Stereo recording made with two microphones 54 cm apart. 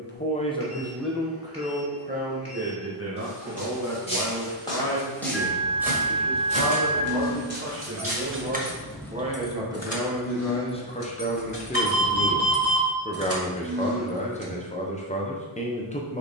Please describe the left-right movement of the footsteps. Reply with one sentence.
In this clip you hear the footsteps go from the left side to the right.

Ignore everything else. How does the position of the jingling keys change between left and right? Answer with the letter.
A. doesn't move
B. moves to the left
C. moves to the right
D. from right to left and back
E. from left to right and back
D.